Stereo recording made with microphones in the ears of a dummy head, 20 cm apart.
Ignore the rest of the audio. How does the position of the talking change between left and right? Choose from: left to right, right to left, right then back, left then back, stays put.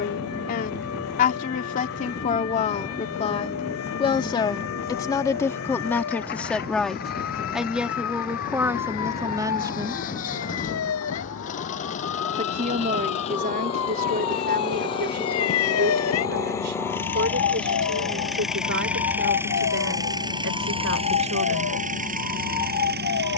left to right.